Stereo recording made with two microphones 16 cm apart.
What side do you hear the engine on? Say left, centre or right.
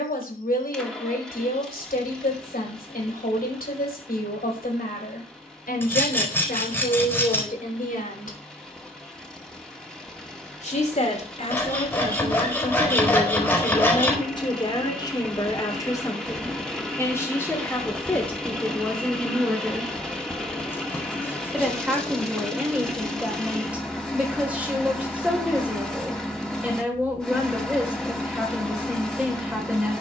centre.